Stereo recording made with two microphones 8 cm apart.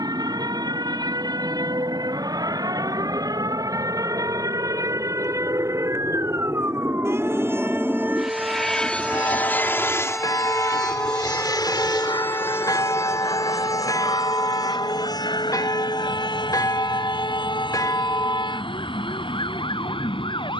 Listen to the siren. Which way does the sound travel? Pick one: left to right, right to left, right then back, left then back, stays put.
right to left.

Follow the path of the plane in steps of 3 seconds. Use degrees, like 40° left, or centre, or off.
60° right, 50° right, 10° right, 40° left, 60° left, 70° left, 80° left.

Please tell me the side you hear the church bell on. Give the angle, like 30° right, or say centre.
50° left.